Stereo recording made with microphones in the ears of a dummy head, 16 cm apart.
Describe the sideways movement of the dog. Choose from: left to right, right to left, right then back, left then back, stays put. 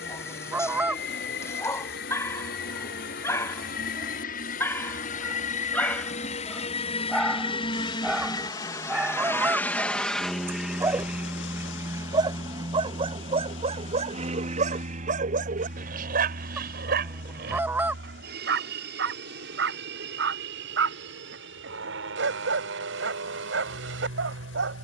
left to right.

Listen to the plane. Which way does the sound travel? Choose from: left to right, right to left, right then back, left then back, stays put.
left to right.